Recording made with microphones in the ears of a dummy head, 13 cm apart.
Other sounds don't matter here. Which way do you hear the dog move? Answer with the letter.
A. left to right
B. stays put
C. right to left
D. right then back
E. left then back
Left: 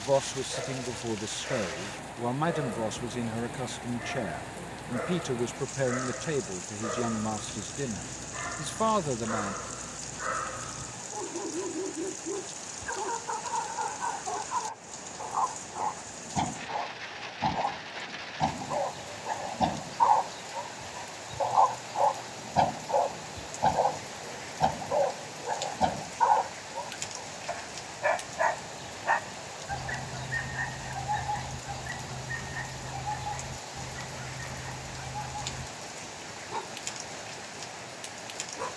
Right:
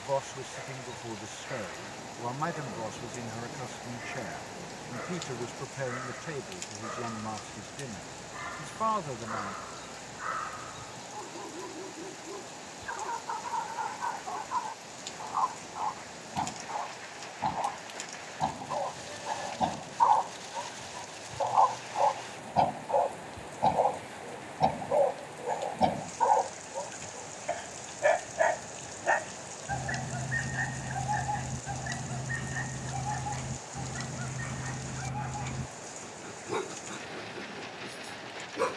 A.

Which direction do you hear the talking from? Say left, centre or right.
left.